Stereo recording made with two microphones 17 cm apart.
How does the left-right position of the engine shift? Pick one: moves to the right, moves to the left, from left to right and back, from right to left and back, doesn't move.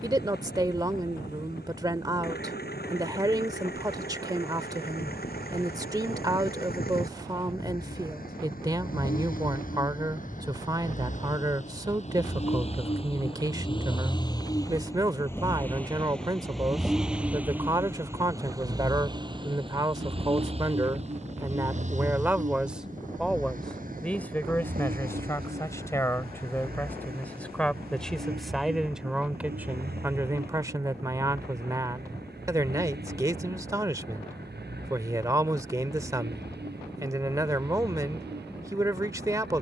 moves to the right.